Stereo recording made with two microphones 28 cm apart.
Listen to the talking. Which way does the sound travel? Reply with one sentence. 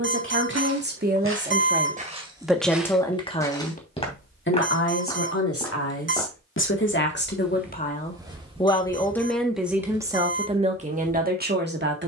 You can hear the talking go left and come back.